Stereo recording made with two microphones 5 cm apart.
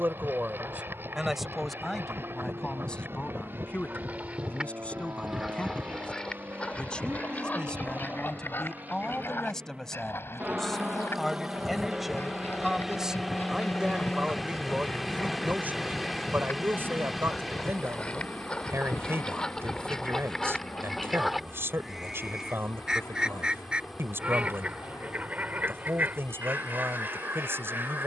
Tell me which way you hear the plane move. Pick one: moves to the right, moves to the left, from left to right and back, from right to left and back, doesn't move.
moves to the left.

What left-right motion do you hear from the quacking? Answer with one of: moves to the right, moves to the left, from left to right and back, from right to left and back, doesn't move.
from right to left and back.